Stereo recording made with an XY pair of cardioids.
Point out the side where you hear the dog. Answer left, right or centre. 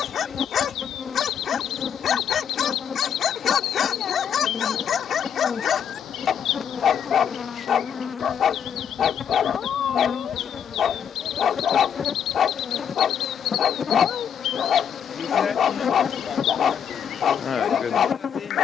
left.